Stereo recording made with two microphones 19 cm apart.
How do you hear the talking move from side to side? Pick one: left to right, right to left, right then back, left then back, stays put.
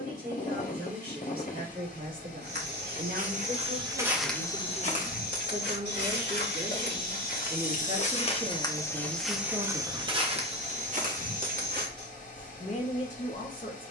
right to left.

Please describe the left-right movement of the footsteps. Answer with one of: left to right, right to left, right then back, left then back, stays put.
left then back.